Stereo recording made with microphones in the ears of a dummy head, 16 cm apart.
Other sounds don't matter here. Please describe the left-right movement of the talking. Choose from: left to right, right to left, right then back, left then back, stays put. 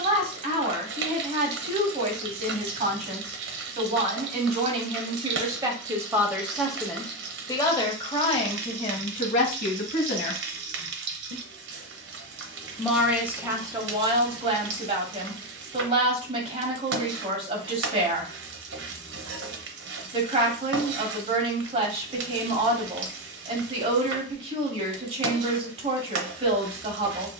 left then back.